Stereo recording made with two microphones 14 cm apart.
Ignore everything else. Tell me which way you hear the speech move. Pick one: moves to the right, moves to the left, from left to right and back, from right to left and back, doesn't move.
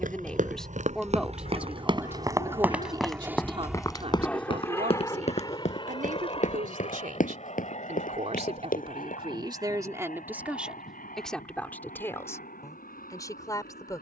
from left to right and back.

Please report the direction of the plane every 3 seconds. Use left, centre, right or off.
right, centre, left, left, left.